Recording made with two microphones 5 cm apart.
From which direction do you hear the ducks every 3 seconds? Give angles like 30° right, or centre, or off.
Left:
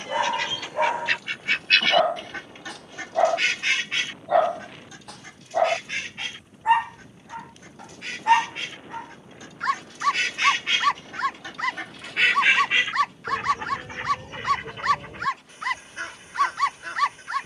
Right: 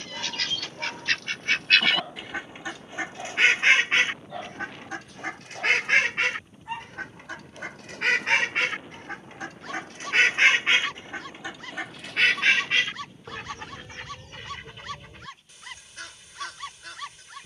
centre, 50° right, 70° right, 30° right, 20° left, 40° left.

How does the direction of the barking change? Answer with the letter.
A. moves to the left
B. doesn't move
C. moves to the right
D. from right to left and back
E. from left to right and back
B.